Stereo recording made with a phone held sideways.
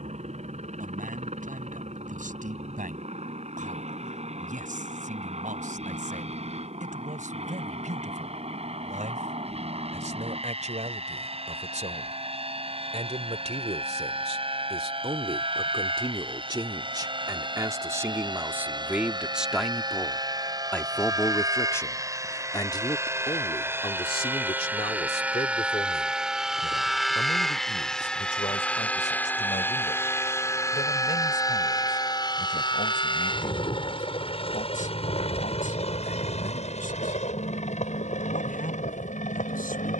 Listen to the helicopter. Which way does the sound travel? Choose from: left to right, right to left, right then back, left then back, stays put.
right to left.